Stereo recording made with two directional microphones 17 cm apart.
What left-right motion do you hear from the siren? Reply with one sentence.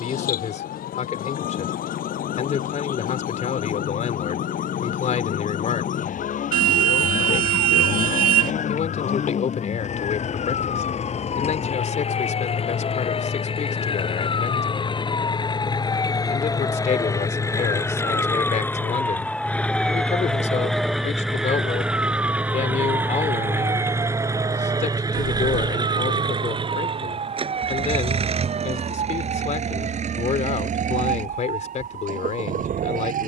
In this clip you hear the siren travel towards the right.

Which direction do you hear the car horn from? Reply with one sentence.
You can hear the car horn on the right.